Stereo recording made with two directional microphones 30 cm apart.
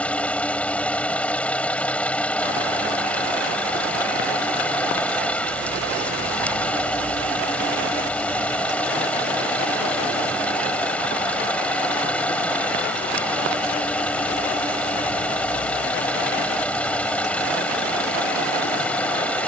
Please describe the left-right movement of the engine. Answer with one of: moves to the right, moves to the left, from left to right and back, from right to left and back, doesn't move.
doesn't move.